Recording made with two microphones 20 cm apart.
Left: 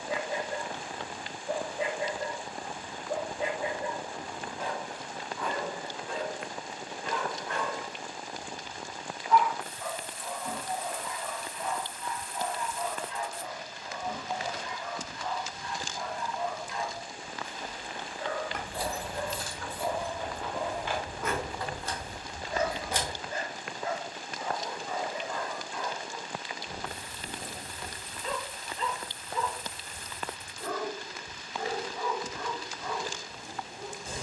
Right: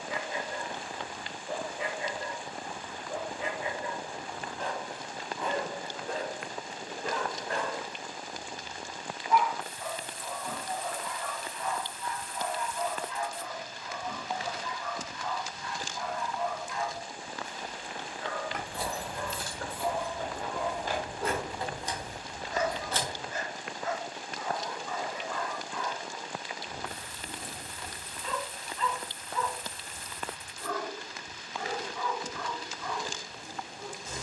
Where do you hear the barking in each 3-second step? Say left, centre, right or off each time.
left, centre, right, centre, left, left, left, left, left, left, left, left.